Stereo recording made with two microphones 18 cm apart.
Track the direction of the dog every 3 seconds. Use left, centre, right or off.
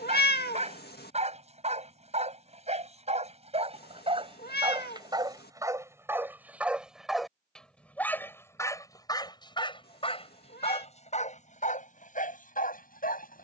right, right, centre, left, left.